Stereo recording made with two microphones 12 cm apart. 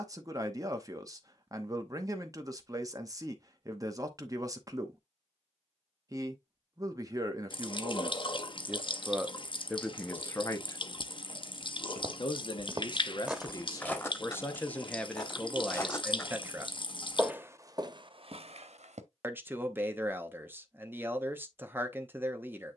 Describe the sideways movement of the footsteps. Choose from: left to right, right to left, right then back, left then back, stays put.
left then back.